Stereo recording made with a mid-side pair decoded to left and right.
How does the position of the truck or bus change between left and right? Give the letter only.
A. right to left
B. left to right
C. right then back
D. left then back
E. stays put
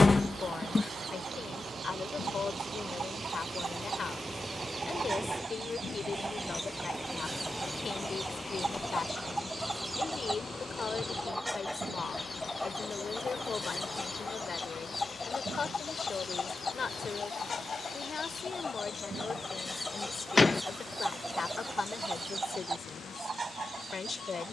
A.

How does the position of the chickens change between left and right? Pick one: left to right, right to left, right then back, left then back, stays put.
left then back.